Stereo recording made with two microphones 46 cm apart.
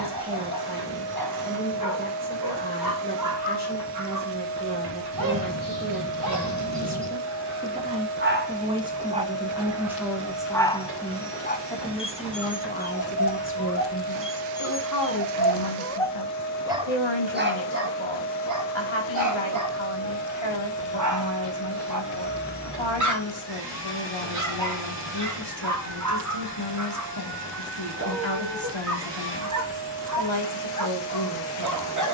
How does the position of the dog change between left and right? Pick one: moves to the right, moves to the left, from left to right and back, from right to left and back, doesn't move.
from right to left and back.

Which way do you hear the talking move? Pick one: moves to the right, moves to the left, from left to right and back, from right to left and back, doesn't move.
moves to the left.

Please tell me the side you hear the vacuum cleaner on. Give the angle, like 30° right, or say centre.
60° right.